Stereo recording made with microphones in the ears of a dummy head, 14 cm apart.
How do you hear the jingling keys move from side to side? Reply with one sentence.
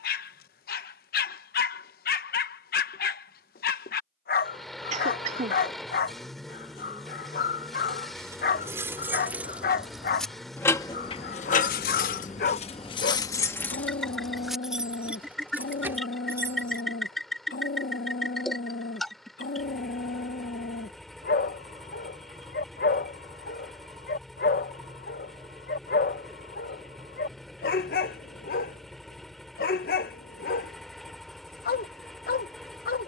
In this clip you hear the jingling keys go left and come back.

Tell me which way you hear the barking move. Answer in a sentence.
In this clip you hear the barking stay put.